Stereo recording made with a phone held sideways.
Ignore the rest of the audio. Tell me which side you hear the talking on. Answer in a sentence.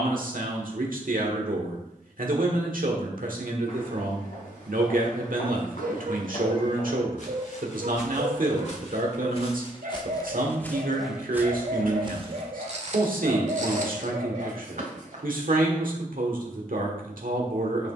You can hear the talking on the right.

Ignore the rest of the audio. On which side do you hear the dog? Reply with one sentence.
You can hear the dog on the right.